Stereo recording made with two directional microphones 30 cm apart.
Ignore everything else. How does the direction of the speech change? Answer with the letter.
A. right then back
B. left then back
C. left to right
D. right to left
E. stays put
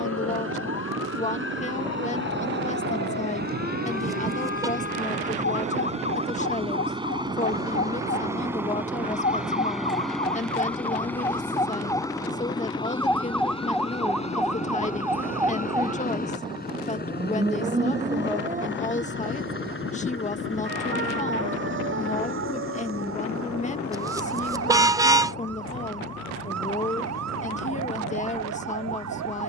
E.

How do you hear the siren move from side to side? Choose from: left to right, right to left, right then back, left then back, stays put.
left to right.